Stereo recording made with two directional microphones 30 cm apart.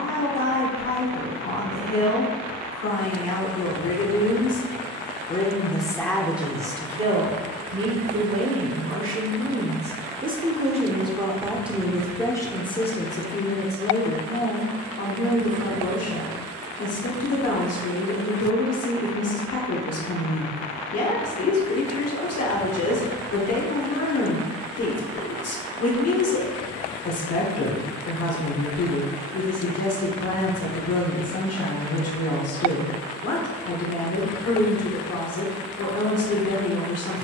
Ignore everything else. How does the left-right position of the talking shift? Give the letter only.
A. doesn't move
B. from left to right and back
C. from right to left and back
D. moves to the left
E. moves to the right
B.